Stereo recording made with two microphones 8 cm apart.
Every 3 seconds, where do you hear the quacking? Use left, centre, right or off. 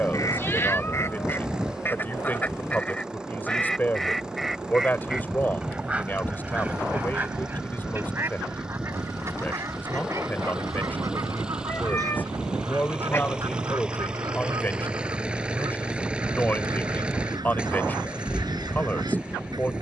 left, centre, right, right, right, right, right.